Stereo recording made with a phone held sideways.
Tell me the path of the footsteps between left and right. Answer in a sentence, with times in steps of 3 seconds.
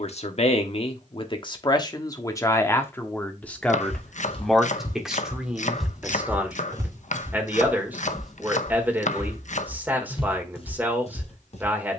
In this clip you hear the footsteps not at all from 0 s, on the left from 3 s, in the centre from 6 s and on the left from 9 s.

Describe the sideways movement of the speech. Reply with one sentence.
You can hear the speech move from left to right.